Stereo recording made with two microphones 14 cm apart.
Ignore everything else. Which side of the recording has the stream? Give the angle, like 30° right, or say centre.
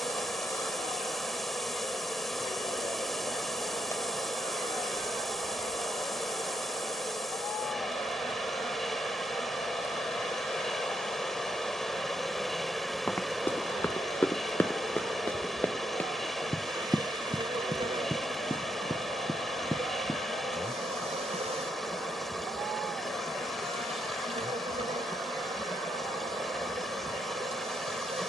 centre.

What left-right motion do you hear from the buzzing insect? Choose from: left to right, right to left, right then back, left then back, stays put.
left to right.